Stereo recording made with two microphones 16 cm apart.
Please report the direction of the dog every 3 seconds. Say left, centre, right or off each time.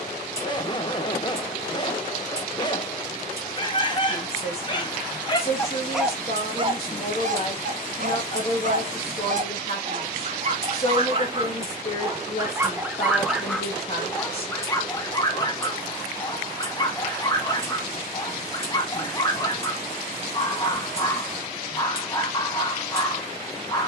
left, left, right, right, centre, left, left, left.